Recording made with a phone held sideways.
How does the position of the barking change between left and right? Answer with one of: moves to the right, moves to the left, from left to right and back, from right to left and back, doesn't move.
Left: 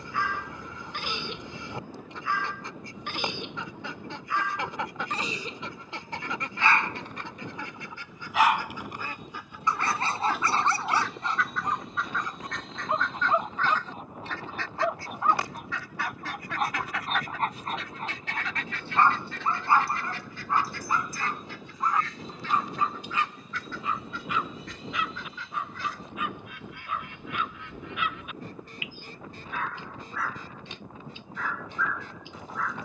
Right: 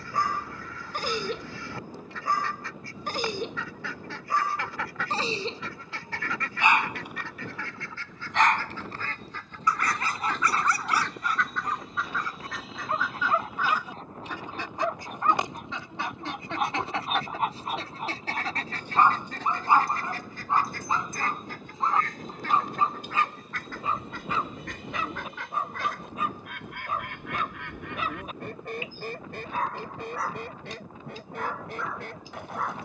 from right to left and back.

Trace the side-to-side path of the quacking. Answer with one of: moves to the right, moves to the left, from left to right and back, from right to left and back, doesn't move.
moves to the right.